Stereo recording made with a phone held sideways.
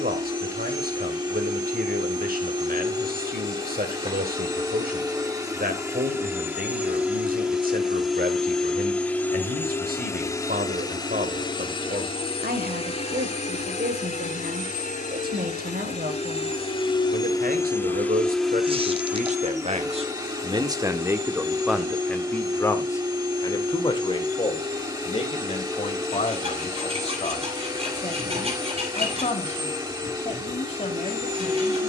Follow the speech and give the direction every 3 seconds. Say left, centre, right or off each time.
right, right, right, right, right, right, right, centre, left, left, left.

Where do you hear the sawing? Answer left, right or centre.
right.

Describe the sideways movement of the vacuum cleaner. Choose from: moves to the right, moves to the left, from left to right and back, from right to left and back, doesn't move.
from right to left and back.